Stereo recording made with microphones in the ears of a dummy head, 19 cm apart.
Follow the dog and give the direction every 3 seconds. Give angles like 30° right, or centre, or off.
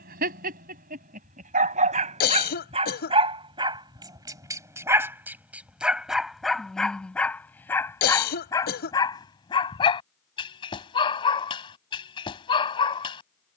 40° right, 20° right, 10° left, 20° left, 20° left.